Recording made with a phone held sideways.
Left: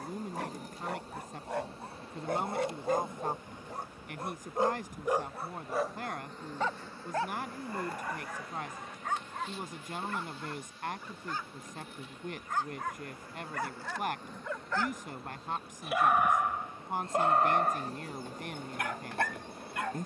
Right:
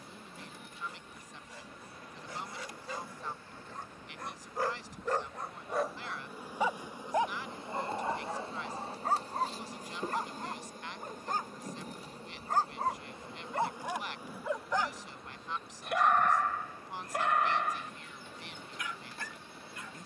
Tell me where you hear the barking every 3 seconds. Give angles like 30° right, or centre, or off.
70° left, 20° left, 20° right, 40° right, 30° right, 20° left, 60° left.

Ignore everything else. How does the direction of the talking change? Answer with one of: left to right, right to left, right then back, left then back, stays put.
stays put.